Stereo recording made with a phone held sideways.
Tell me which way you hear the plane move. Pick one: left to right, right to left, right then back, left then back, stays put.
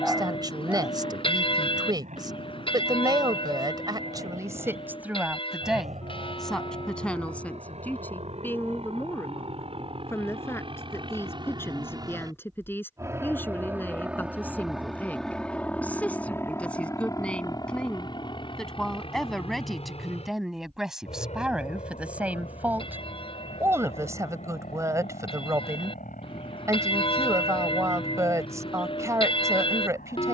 right to left.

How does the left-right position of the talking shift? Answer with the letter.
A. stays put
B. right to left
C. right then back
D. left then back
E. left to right
D.